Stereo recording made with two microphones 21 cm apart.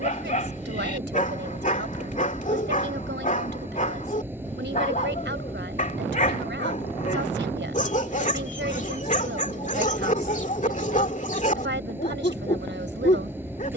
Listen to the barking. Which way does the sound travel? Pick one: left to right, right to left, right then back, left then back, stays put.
stays put.